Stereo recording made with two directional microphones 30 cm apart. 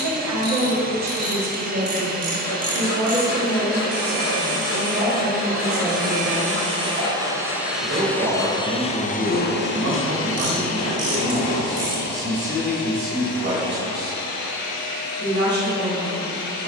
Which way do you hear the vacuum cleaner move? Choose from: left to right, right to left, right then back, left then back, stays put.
right to left.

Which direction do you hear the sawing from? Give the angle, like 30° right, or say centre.
60° left.